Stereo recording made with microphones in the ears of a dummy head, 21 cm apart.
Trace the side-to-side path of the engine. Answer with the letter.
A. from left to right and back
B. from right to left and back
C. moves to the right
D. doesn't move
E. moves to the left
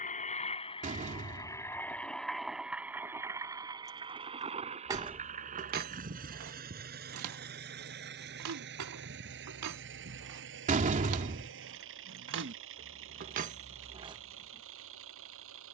C.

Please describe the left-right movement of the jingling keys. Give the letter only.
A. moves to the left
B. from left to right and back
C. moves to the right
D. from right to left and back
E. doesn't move
B.